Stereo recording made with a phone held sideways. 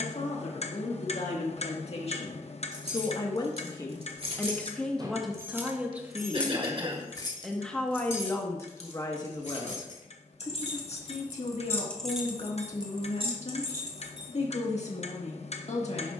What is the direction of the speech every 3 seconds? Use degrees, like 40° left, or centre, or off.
60° left, 10° left, centre, 50° left, 60° left, 60° left.